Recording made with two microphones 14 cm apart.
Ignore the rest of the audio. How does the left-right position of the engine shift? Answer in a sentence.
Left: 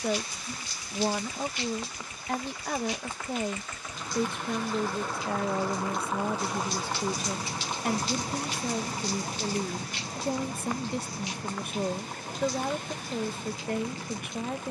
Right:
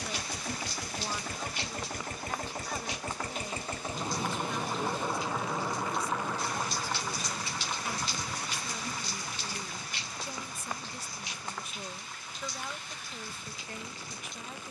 You can hear the engine go from the right side to the left.